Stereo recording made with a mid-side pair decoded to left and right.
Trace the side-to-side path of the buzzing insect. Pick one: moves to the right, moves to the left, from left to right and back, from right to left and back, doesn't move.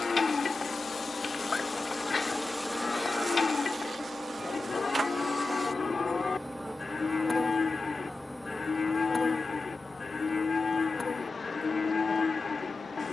from left to right and back.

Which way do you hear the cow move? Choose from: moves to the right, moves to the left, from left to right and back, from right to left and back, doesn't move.
doesn't move.